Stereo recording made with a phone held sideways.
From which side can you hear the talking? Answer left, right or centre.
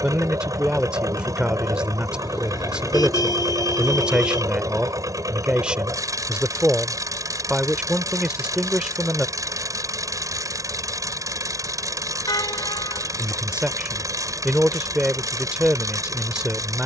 centre.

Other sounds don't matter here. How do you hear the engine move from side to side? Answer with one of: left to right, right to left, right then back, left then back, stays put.
stays put.